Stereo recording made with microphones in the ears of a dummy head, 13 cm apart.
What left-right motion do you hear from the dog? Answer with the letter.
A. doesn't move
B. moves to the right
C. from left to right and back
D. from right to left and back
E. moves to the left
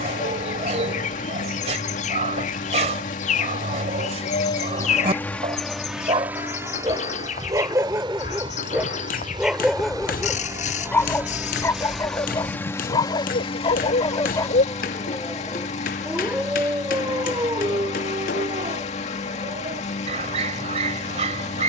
D.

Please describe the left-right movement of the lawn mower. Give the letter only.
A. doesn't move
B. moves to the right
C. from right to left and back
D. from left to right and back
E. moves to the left
D.